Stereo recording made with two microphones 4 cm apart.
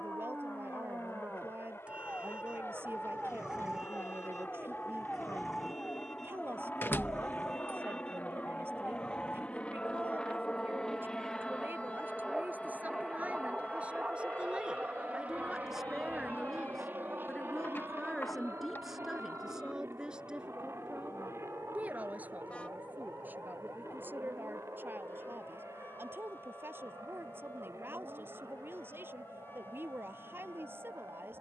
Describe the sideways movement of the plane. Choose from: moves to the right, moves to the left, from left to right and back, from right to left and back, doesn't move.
moves to the right.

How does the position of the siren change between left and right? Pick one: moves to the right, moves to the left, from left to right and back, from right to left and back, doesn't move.
moves to the left.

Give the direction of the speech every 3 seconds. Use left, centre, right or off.
right, right, right, right, right, centre, centre, right, right, right, right.